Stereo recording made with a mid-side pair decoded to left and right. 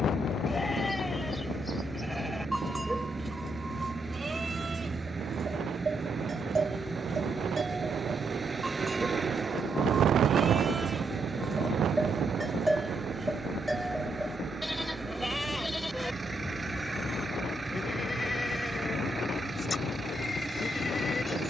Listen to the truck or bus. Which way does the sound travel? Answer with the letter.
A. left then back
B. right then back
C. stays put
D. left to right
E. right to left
C.